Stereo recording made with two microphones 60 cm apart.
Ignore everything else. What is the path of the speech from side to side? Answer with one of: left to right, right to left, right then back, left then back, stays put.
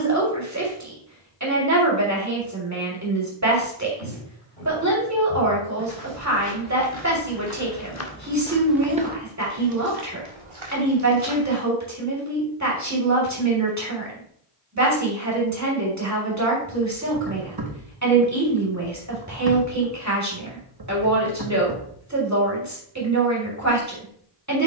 stays put.